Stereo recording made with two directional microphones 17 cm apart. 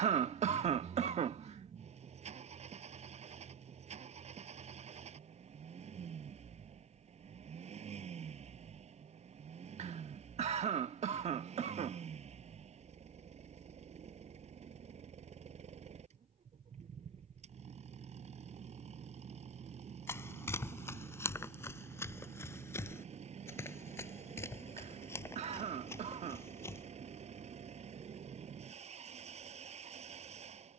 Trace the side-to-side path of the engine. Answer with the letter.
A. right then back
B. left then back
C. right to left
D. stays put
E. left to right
D.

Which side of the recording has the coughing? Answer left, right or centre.
right.